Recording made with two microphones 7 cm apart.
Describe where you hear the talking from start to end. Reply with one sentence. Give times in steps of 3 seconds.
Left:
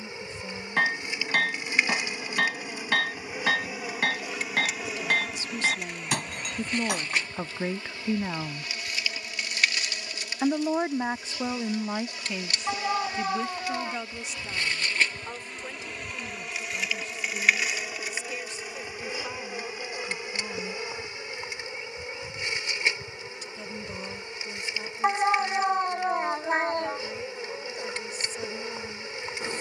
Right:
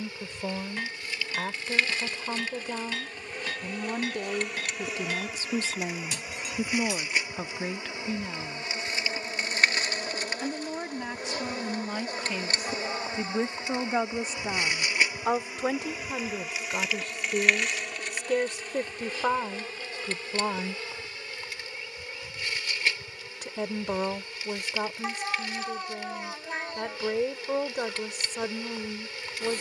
You can hear the talking on the right from 0 s, in the centre from 6 s, on the left from 9 s and on the right from 12 s.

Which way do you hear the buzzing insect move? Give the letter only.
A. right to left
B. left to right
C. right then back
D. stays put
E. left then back
C.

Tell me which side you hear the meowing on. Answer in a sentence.
You can hear the meowing on the left.